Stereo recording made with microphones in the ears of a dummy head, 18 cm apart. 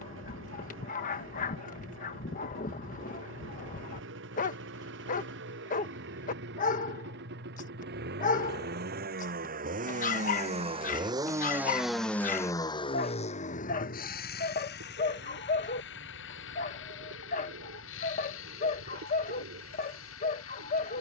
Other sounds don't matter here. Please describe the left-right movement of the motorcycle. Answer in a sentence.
In this clip you hear the motorcycle travel towards the left.